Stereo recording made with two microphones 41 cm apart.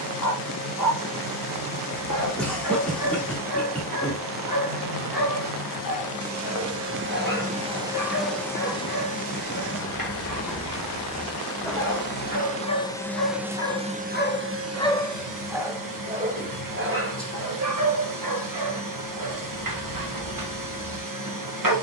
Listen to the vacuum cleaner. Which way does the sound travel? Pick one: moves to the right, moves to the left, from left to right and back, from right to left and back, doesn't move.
from right to left and back.